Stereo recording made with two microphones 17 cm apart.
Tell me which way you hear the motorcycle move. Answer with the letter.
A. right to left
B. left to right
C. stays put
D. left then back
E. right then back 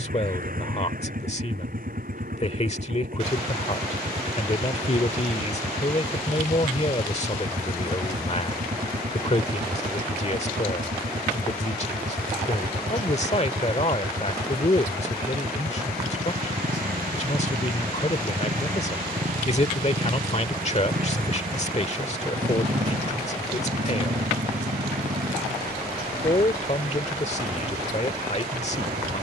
C.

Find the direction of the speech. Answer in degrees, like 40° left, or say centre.
40° left.